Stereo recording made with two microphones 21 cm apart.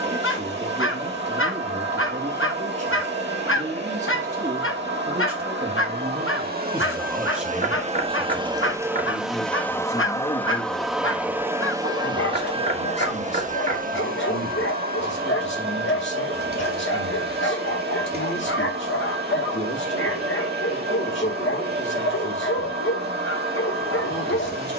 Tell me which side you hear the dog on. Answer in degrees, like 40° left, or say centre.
70° left.